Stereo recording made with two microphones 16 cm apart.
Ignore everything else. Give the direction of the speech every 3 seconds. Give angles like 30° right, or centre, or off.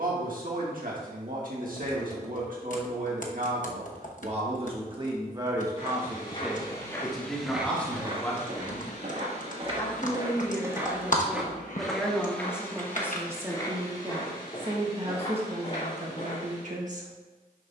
60° right, 40° right, centre, 10° left, 20° right, 40° right.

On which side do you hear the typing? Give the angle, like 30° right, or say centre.
50° left.